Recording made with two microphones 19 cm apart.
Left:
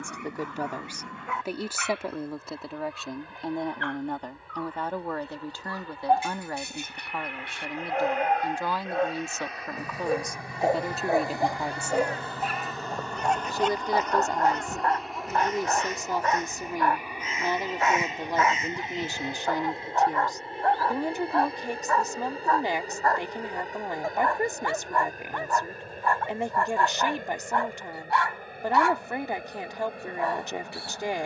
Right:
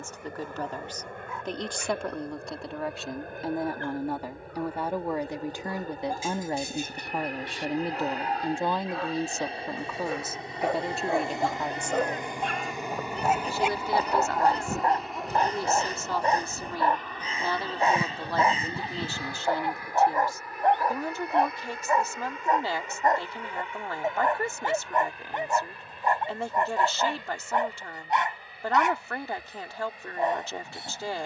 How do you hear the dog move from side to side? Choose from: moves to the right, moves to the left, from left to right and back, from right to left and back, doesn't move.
moves to the right.